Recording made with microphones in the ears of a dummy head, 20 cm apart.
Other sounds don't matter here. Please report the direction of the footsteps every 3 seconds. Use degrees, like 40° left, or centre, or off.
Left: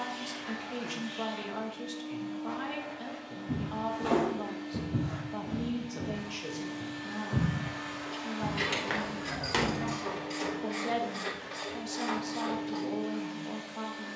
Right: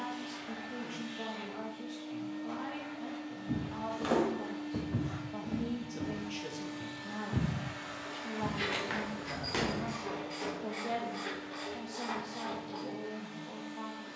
off, 60° right, 10° right, 20° left, off.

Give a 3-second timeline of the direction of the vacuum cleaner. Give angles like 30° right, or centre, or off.
10° left, 20° right, centre, 10° left, 20° left.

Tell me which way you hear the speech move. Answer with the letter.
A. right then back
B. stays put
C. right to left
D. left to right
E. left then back
A.